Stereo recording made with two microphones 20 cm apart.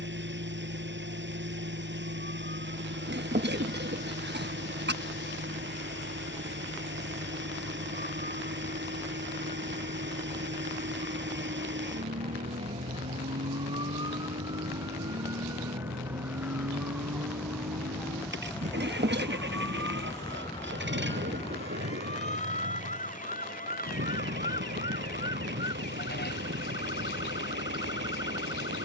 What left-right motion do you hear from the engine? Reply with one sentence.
In this clip you hear the engine stay put.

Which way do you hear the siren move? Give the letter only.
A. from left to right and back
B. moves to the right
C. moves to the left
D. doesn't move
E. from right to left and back
C.